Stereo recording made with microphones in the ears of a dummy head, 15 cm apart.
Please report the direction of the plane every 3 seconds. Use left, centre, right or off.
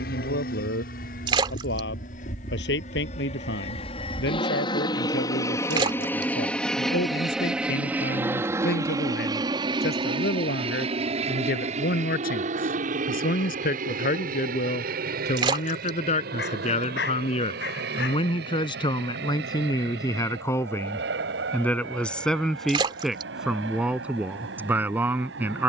left, left, centre, right, right, right, right, right, right.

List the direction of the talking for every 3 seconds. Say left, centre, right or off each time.
left, left, left, left, left, left, left, centre, centre.